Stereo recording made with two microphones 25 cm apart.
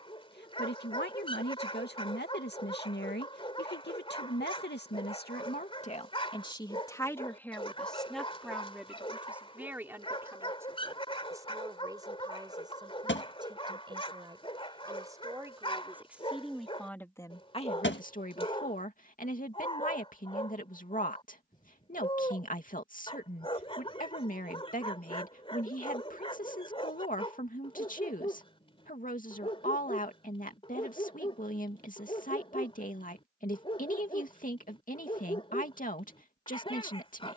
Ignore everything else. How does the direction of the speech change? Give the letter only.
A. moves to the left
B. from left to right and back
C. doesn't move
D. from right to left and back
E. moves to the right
B.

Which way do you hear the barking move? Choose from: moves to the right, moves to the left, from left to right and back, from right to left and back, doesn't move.
doesn't move.